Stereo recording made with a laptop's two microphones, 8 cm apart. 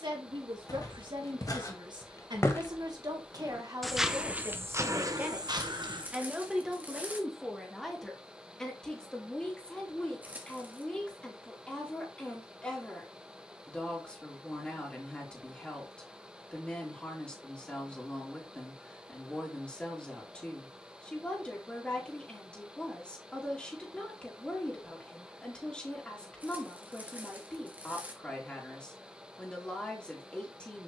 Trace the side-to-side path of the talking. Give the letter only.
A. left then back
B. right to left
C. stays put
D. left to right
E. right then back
B.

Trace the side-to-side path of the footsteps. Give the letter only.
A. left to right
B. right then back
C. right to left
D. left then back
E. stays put
A.